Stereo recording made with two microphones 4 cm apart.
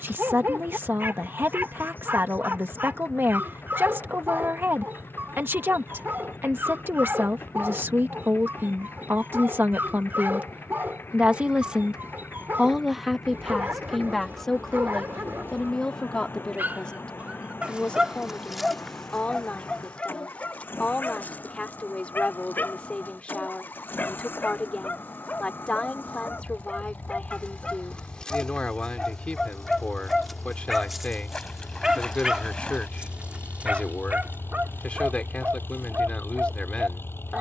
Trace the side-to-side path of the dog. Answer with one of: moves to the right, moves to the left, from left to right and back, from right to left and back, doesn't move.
from right to left and back.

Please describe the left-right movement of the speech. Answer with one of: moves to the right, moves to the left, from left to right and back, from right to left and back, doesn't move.
moves to the left.